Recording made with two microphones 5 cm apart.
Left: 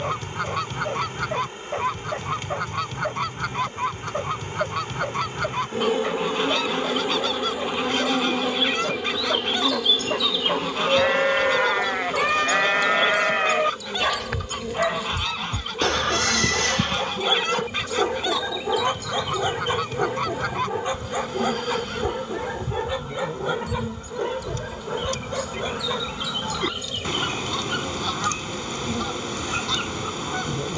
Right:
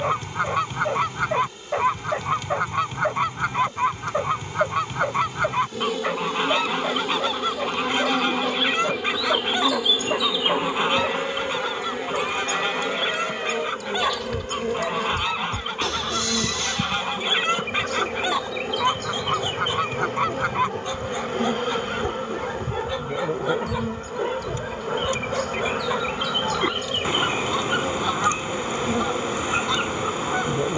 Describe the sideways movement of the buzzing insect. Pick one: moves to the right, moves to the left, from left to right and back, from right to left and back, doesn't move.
moves to the right.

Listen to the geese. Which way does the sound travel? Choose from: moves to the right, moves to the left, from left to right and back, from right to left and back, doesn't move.
doesn't move.